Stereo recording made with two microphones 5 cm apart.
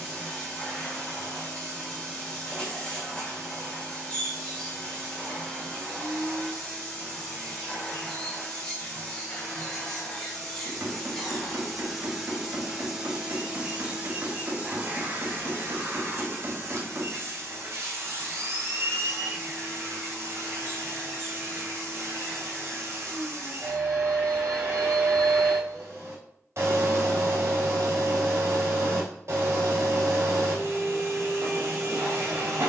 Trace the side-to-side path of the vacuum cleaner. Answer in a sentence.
In this clip you hear the vacuum cleaner travel towards the right.